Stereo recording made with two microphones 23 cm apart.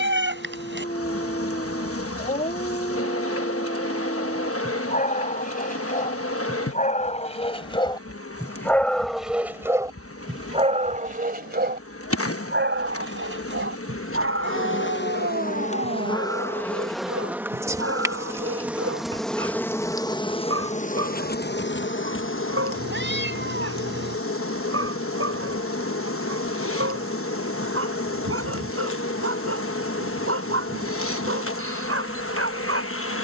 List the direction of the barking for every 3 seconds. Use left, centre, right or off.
left, left, left, right, right, right, right, right, right, right, right.